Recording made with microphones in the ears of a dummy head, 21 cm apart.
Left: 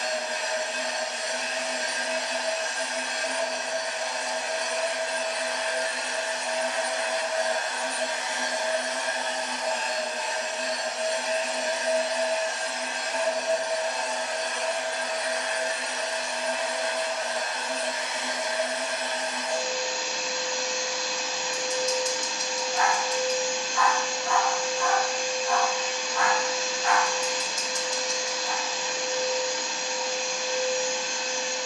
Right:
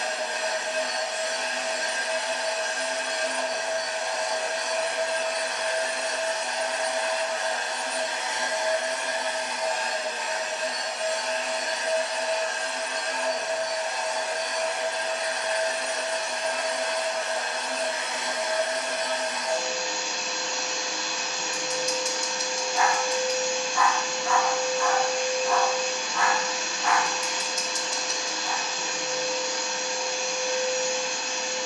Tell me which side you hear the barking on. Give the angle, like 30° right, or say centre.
60° right.